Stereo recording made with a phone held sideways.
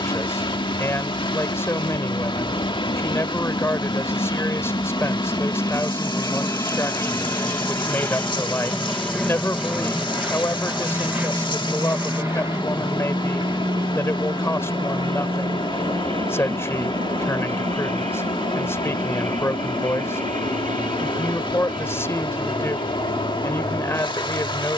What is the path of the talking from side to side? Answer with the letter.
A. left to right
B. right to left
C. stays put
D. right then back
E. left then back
C.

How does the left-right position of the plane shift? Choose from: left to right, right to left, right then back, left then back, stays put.
left to right.